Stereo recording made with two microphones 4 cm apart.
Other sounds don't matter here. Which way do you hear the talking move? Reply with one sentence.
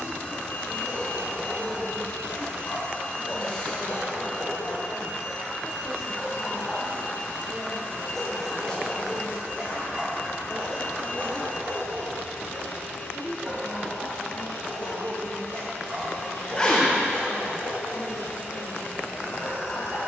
You can hear the talking go left and come back.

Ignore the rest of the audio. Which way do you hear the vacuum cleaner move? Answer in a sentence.
You can hear the vacuum cleaner stay put.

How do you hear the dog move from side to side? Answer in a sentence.
You can hear the dog move from left to right.